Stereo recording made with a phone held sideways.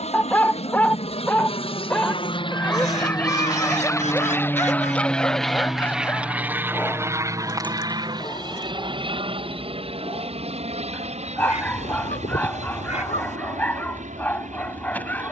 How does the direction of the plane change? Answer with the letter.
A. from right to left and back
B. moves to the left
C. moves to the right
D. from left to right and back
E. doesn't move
C.